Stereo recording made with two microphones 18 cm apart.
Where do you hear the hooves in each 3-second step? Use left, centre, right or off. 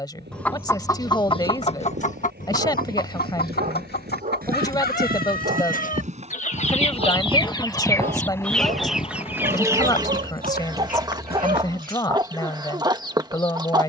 right, right, centre, left, off.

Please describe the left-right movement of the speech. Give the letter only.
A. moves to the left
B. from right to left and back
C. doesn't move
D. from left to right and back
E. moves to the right
C.